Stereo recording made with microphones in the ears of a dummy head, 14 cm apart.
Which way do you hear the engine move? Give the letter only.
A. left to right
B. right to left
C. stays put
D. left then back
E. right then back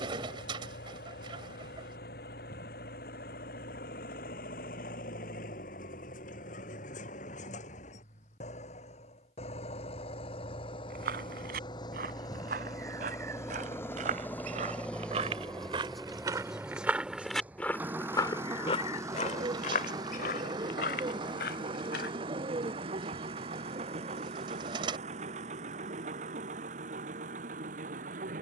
A.